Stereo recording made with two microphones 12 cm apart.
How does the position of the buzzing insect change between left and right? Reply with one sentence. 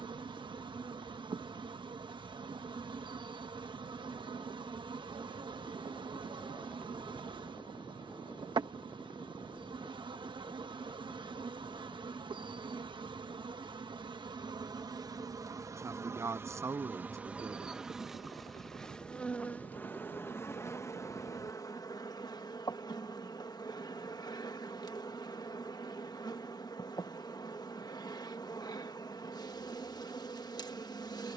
You can hear the buzzing insect go from the right side to the left.